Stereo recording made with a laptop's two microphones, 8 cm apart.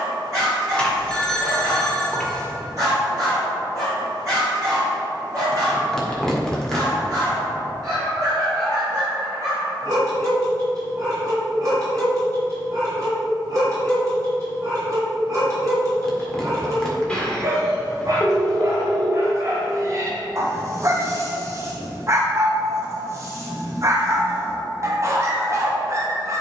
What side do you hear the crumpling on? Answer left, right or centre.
centre.